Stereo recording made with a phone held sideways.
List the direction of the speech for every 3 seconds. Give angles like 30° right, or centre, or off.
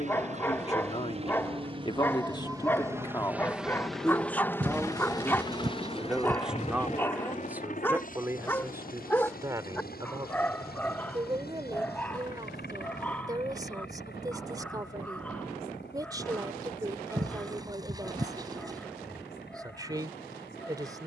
40° left, 10° left, 10° right, 20° right, 20° right, 20° right, 20° right.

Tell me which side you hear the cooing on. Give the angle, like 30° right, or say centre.
20° right.